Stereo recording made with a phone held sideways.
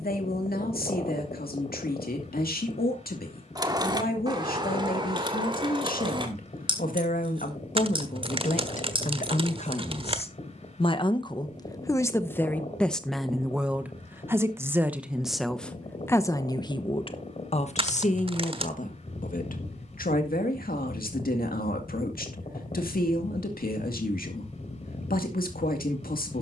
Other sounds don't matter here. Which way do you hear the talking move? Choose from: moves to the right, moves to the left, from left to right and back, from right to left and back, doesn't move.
from left to right and back.